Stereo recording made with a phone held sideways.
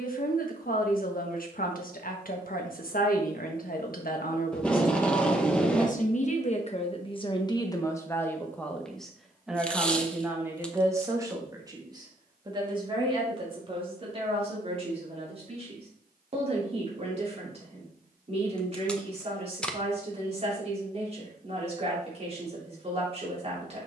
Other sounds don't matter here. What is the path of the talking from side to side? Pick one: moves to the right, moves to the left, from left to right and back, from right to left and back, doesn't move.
moves to the right.